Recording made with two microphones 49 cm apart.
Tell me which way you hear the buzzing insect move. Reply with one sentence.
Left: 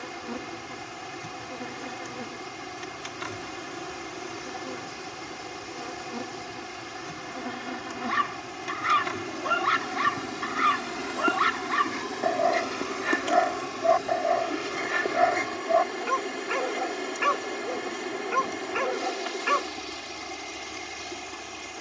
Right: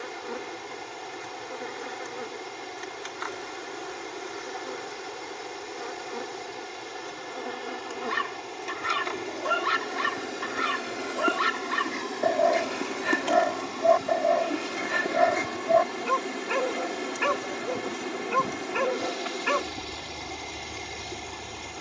You can hear the buzzing insect move from left to right.